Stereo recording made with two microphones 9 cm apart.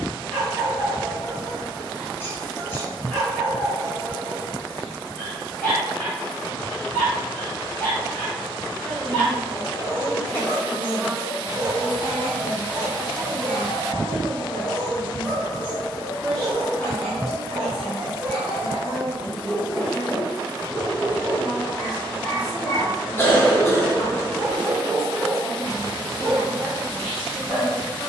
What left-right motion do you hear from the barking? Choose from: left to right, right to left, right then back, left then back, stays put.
stays put.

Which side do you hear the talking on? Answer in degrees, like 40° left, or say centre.
centre.